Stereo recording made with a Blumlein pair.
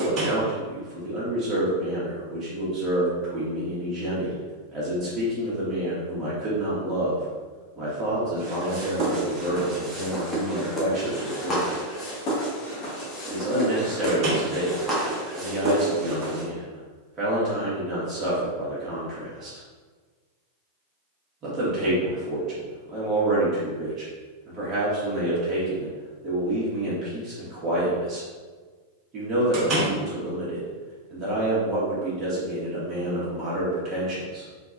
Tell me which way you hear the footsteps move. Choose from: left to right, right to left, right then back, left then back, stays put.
left then back.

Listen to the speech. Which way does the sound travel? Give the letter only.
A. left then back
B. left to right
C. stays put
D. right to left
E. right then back
C.